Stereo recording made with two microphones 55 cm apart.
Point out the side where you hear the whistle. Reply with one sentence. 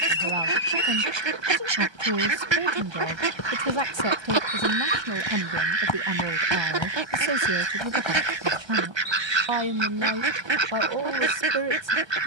In this clip you hear the whistle on the left.